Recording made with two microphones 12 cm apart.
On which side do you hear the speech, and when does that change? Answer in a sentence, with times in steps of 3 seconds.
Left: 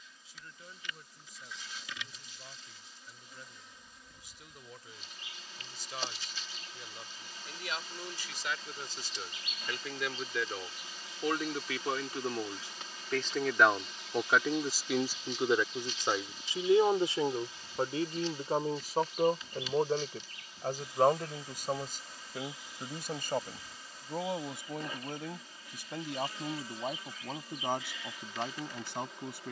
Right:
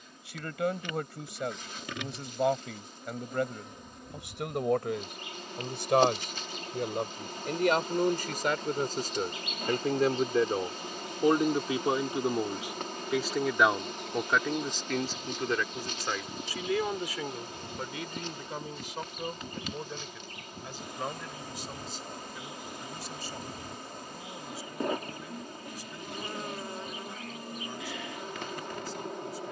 You can hear the speech on the right from 0 s, in the centre from 12 s and on the left from 15 s.